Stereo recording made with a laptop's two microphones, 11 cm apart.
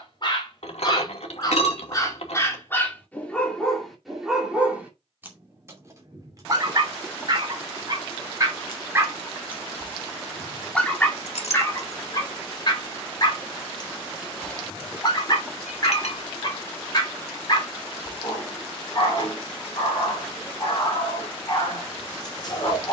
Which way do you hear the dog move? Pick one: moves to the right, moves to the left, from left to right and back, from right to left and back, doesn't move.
from left to right and back.